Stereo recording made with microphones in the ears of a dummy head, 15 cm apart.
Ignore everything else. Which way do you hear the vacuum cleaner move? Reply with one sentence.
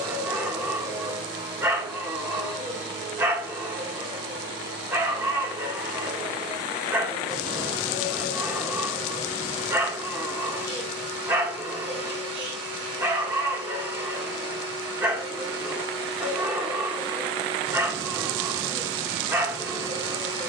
In this clip you hear the vacuum cleaner stay put.